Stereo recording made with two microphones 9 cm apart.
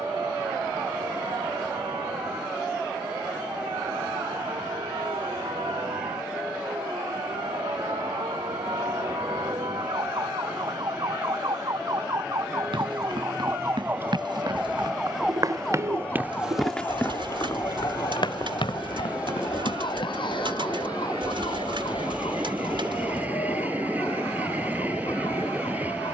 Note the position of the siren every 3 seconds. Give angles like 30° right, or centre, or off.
70° right, 70° right, 70° right, 60° right, 30° right, 20° left, 60° left, 70° left, 80° left.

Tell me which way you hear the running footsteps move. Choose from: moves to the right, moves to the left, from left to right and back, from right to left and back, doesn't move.
moves to the left.